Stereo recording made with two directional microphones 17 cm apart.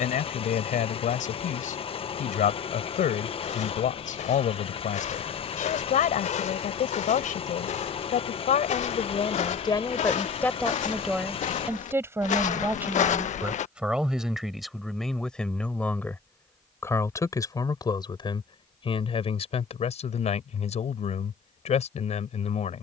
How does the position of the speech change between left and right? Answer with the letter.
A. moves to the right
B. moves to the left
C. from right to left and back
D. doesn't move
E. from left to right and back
E.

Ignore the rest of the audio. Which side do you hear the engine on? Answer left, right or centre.
left.